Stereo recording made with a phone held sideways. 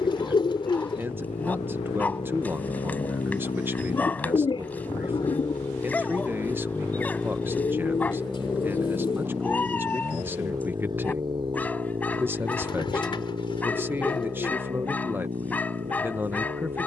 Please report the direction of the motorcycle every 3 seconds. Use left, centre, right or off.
left, left, centre, right, right, right.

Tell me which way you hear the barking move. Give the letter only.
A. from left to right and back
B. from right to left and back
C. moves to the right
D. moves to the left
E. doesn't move
E.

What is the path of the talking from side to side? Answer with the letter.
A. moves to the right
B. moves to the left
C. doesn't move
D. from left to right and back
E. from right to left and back
C.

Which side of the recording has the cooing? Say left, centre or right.
left.